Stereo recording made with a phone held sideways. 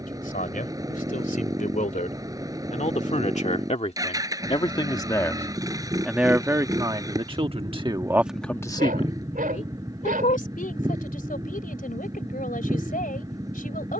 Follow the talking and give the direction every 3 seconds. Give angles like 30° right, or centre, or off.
60° left, 40° left, 10° right, 60° left, 70° left.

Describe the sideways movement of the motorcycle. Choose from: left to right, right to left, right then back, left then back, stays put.
stays put.